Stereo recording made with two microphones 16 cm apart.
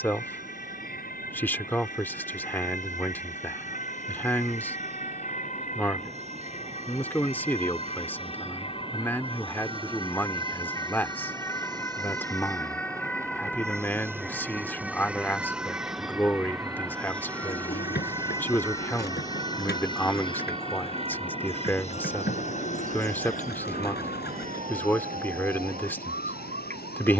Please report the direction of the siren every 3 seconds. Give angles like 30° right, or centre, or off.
60° left, 50° left, 40° left, 20° left, centre, 10° right, 30° right, 40° right, 50° right.